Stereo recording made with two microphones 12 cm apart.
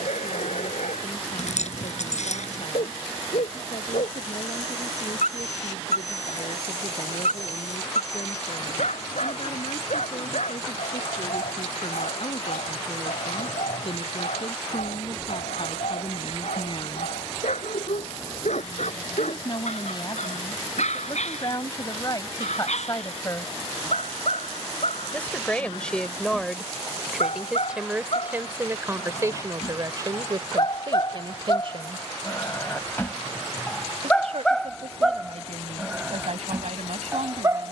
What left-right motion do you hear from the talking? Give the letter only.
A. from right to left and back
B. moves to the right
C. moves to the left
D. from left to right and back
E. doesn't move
B.